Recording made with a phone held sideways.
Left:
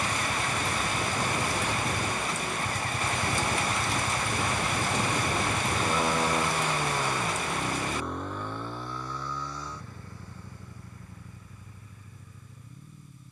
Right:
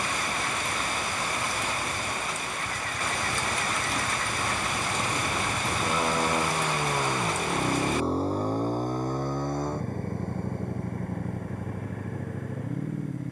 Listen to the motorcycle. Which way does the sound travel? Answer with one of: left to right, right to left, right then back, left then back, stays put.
left to right.